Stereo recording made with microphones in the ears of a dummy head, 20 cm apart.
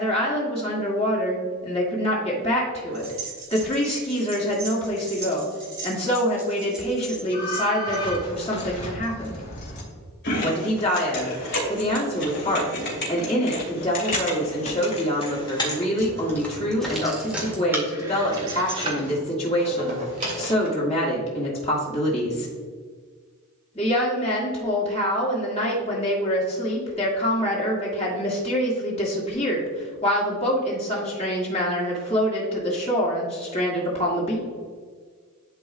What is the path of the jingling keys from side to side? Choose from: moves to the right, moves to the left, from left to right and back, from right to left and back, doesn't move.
from right to left and back.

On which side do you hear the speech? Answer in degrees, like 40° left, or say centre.
30° left.